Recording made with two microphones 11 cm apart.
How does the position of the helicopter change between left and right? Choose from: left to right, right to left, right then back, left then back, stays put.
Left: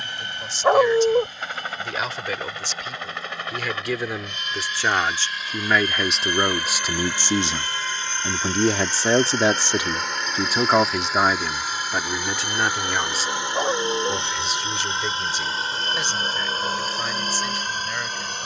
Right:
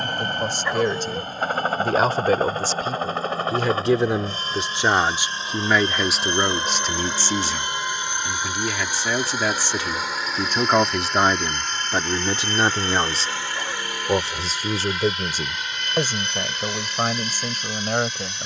right to left.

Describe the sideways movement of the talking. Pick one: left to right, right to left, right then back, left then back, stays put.
left then back.